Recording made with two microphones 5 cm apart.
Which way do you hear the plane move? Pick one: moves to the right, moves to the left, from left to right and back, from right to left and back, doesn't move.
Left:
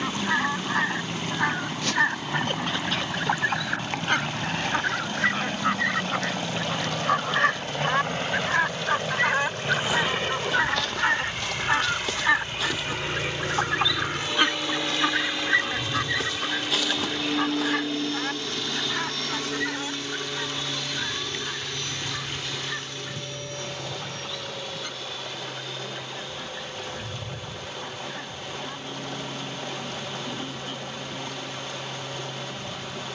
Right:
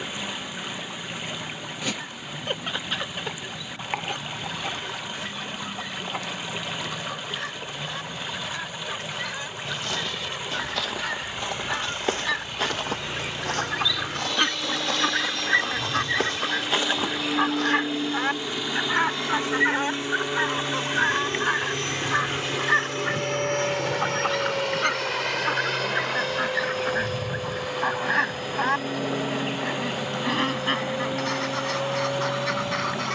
moves to the right.